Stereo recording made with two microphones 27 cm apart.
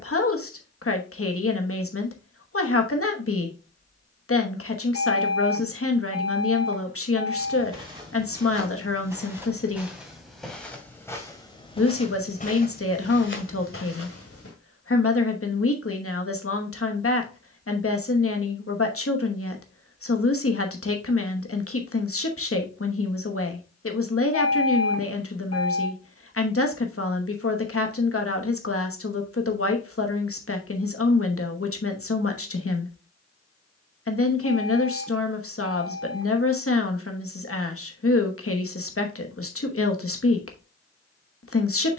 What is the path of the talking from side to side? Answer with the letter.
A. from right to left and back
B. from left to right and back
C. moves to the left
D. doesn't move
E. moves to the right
D.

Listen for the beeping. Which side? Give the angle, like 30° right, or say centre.
70° left.